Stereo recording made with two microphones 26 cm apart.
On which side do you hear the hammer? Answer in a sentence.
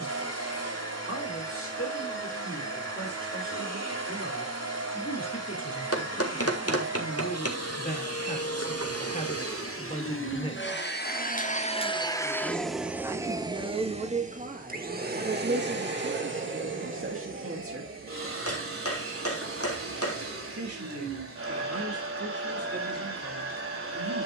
You can hear the hammer on the left.